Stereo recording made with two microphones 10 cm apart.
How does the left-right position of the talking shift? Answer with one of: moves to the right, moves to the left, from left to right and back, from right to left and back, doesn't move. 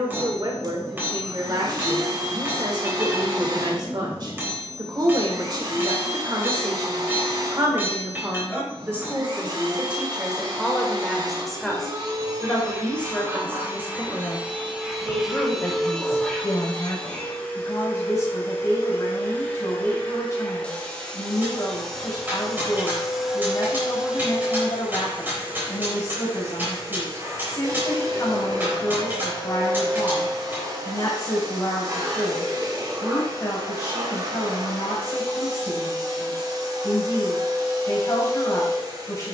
moves to the left.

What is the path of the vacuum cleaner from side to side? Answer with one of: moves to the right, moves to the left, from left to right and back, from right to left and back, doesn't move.
from right to left and back.